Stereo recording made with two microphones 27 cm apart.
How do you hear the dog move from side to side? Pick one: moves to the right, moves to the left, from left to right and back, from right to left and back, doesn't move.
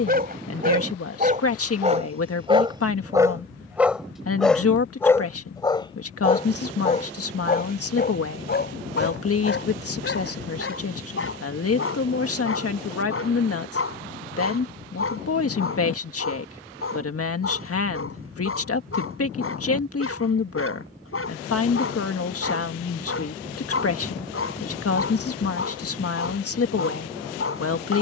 moves to the left.